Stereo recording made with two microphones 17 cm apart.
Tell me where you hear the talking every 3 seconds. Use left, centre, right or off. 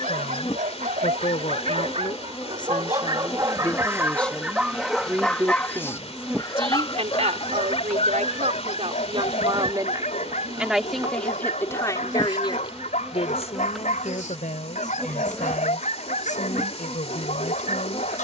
left, centre, right, centre, left, left.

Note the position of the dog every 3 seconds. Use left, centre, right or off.
right, centre, left, left, left, left.